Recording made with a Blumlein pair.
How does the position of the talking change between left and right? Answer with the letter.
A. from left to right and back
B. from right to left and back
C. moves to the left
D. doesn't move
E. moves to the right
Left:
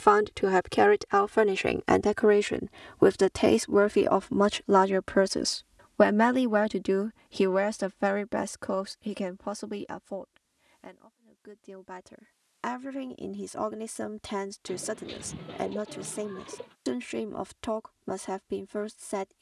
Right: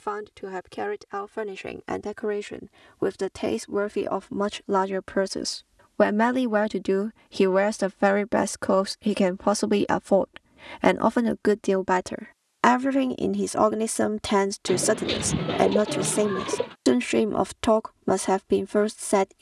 E.